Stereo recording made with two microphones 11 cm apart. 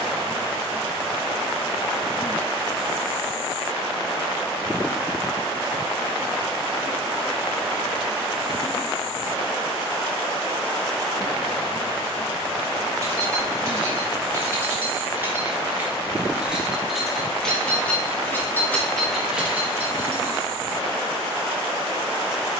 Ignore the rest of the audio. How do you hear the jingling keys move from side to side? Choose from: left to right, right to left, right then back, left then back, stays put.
left then back.